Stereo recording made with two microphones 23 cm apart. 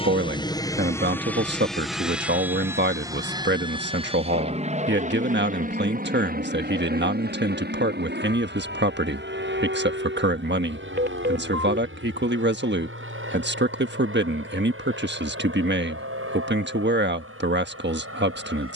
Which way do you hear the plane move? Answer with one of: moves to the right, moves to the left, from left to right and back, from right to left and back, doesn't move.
moves to the right.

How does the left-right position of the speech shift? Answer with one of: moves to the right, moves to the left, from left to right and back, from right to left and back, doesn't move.
doesn't move.